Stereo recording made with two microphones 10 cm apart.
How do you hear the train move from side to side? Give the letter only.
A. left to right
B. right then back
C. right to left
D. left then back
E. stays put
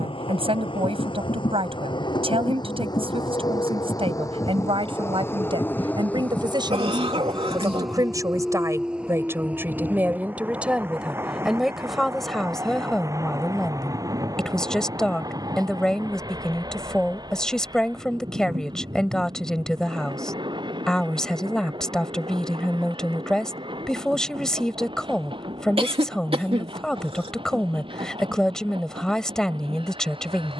A.